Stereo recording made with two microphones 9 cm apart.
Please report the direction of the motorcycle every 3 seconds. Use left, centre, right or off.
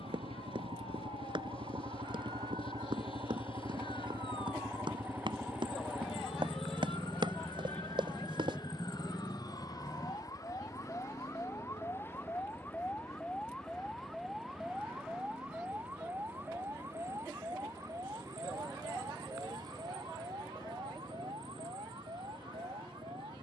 right, right, centre, left, left, left, left, left.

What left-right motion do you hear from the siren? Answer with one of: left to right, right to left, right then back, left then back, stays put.
left to right.